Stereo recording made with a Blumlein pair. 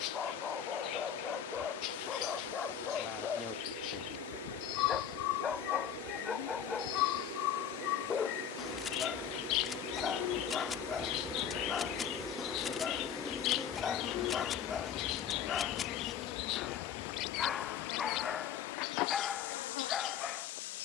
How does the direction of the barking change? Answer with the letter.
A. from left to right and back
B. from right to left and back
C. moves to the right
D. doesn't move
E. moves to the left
D.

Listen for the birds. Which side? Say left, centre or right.
left.